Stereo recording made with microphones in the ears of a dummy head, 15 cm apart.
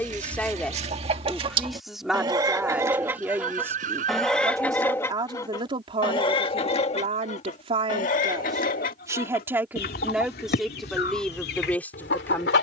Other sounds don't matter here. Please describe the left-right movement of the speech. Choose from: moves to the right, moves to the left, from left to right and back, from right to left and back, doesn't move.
from left to right and back.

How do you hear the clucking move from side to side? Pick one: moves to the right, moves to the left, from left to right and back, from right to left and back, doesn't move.
moves to the left.